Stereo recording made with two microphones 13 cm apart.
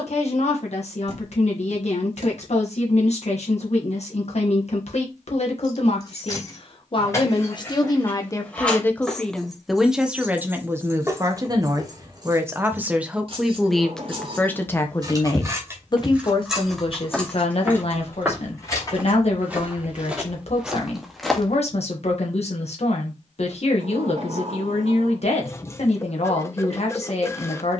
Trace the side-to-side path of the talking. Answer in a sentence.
In this clip you hear the talking move from left to right and back again.